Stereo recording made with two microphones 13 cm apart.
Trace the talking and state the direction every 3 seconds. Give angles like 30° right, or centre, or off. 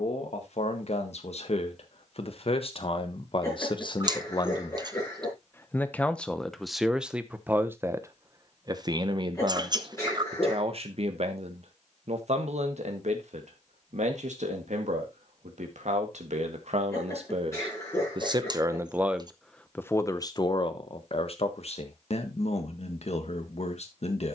60° left, 30° left, 10° right, 50° right, 70° right, 60° right, 10° left, 60° left.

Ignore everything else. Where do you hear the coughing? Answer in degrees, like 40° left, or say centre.
20° left.